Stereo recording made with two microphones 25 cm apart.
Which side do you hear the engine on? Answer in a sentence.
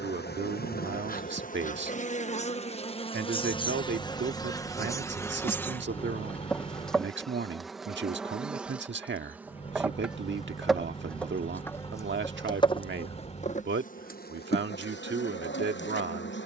You can hear the engine on the left.